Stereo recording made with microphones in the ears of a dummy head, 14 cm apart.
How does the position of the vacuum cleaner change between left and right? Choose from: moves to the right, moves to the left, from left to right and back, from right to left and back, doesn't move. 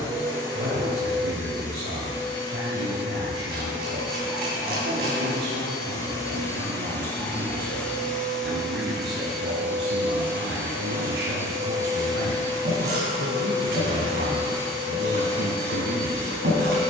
moves to the right.